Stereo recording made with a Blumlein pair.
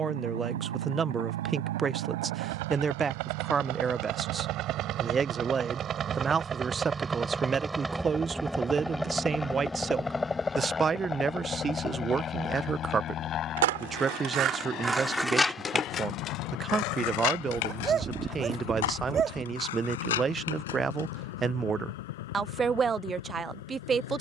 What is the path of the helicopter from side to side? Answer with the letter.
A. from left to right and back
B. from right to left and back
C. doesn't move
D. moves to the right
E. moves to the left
E.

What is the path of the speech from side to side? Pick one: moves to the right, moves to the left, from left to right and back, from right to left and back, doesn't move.
doesn't move.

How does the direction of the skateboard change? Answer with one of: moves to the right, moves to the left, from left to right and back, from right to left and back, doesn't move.
moves to the left.